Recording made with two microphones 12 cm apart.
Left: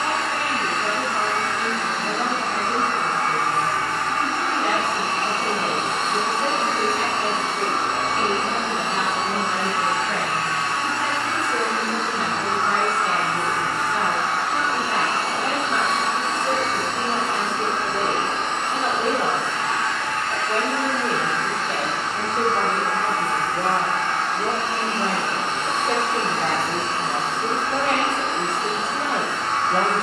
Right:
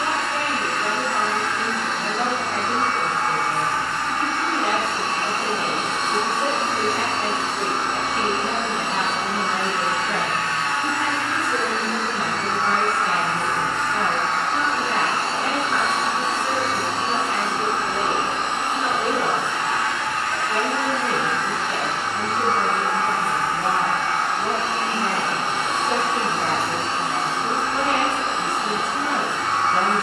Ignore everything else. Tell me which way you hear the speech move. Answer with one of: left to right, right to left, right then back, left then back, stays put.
right to left.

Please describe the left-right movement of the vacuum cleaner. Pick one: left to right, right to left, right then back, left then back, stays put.
left to right.